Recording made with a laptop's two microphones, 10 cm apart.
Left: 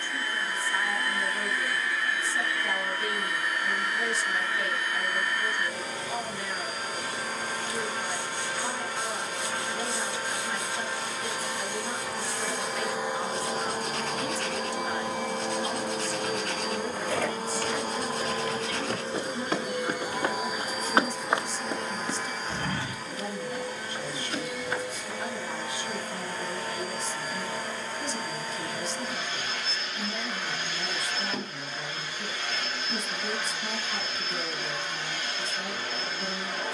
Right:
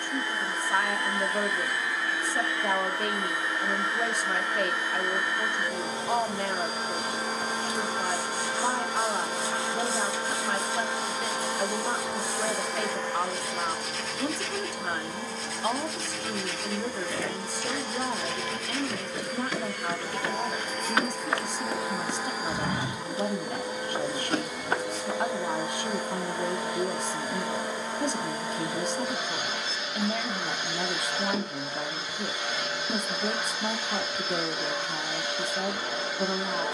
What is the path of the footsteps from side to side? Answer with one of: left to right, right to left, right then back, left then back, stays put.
left to right.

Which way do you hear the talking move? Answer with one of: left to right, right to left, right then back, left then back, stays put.
stays put.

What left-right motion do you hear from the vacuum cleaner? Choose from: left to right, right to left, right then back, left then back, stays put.
left then back.